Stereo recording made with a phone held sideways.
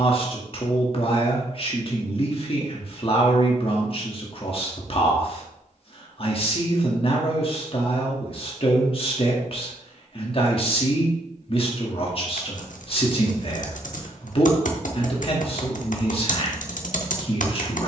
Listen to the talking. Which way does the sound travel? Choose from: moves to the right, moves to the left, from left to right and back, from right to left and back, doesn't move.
doesn't move.